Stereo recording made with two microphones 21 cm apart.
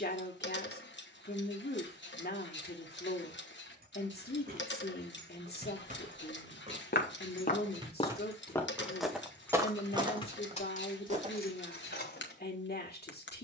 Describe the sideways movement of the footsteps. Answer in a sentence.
You can hear the footsteps go from the left side to the right.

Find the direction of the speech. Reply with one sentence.
In this clip you hear the speech on the left.